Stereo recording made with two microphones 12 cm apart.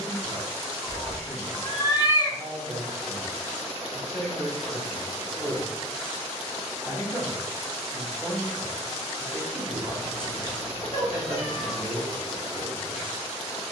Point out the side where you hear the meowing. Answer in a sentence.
You can hear the meowing on the left.